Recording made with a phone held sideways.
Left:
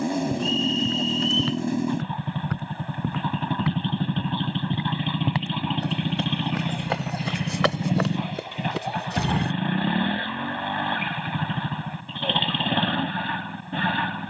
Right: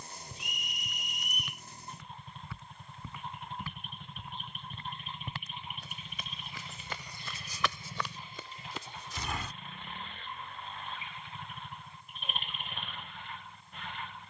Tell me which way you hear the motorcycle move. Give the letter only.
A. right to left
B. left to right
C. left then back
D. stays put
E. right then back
D.